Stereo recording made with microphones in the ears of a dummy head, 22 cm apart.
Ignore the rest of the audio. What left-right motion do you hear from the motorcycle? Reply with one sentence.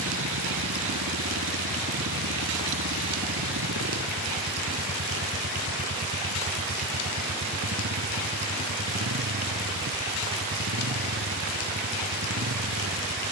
In this clip you hear the motorcycle stay in one place.